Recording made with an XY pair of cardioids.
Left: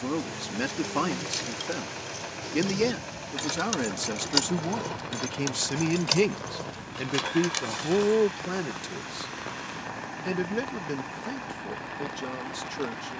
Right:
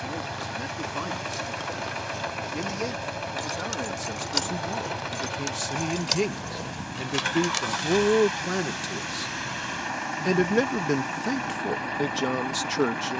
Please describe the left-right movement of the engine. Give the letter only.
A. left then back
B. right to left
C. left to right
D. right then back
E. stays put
E.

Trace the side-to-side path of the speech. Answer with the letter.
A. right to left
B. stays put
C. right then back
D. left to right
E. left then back
D.